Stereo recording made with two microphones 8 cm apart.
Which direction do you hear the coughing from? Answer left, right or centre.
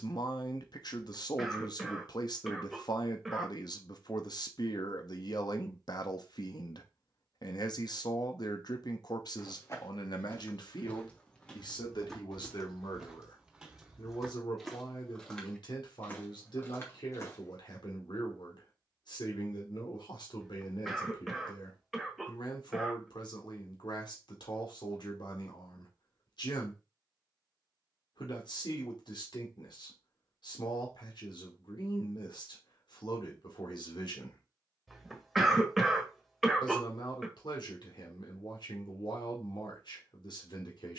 centre.